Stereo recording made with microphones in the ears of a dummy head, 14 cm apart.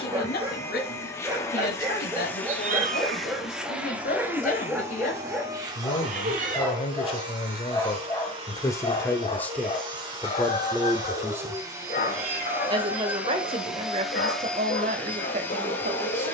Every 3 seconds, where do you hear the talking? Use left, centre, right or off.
left, left, left, centre, right, right.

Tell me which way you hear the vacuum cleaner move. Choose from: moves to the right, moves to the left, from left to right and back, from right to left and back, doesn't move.
from left to right and back.